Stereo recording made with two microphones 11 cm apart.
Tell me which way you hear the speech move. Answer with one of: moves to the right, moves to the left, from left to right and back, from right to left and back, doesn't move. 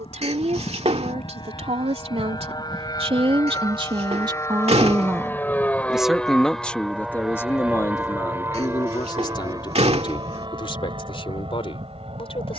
moves to the left.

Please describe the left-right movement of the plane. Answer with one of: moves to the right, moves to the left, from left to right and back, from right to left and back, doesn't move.
moves to the right.